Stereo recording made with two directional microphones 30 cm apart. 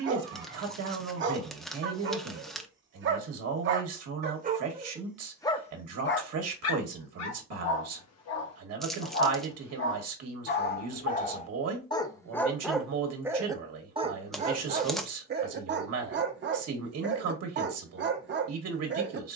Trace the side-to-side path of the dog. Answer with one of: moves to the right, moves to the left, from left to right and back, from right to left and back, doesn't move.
from right to left and back.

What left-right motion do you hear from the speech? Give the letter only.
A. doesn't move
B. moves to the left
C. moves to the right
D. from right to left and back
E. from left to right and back
A.